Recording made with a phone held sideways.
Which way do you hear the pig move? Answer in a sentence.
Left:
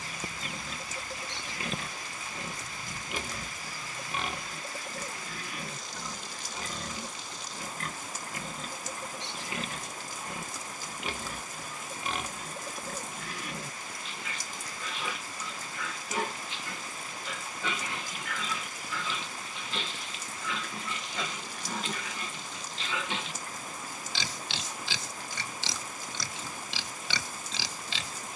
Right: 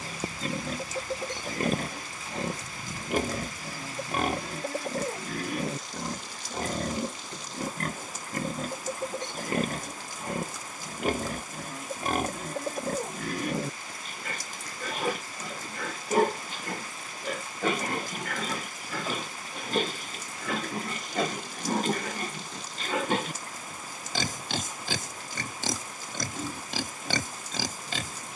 You can hear the pig stay in one place.